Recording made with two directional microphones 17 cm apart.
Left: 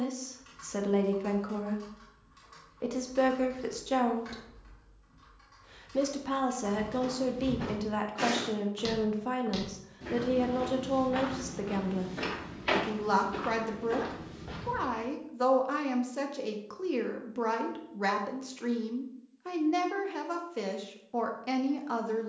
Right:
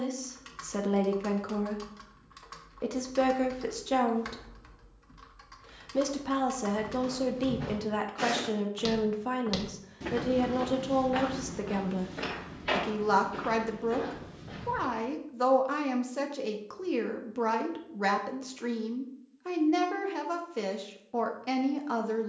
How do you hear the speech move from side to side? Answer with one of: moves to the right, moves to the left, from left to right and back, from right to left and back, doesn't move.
doesn't move.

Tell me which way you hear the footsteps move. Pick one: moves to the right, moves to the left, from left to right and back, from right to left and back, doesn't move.
from left to right and back.